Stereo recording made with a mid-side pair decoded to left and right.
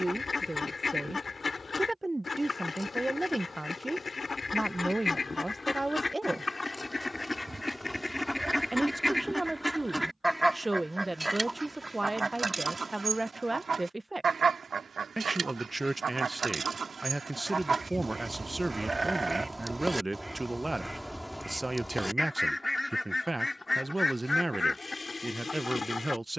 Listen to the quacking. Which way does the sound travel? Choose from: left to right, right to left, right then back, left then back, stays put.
right then back.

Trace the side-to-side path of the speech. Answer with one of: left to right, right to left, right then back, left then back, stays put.
stays put.